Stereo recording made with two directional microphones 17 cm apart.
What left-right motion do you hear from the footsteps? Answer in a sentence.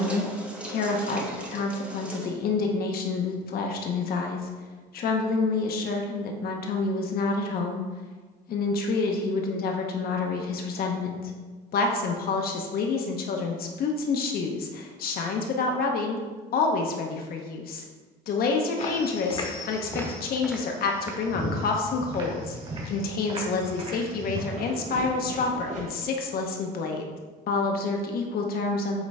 In this clip you hear the footsteps go from the left side to the right.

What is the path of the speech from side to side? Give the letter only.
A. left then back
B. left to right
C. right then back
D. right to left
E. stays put
E.